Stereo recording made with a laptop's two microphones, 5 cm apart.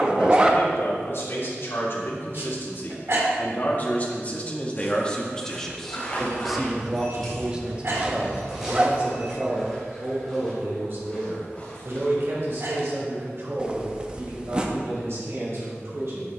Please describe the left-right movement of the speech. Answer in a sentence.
You can hear the speech travel towards the right.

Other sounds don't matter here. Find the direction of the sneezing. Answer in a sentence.
You can hear the sneezing on the right.